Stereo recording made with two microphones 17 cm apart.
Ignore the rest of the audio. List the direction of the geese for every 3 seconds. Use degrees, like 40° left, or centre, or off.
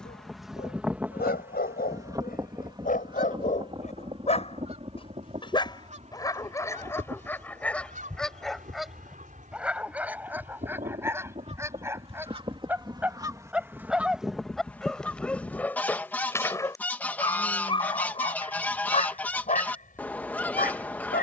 10° right, 40° right, 50° right, 40° right, 10° right, 10° left, 10° left.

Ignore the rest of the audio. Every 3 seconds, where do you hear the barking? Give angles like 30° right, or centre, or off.
60° left, 40° left, 10° left, 10° right, 10° right, 20° left, 40° left.